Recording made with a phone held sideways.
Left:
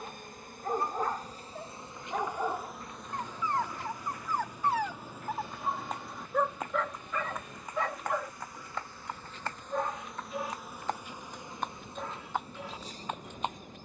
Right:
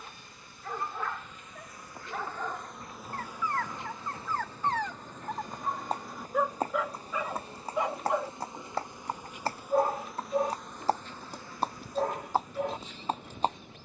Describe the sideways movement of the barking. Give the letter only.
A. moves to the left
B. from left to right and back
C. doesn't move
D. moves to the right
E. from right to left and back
D.